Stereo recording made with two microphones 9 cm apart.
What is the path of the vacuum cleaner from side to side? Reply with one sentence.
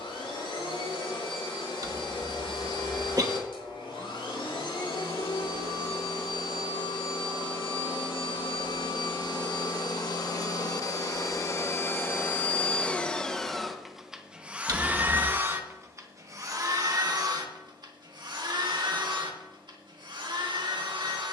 You can hear the vacuum cleaner travel towards the right.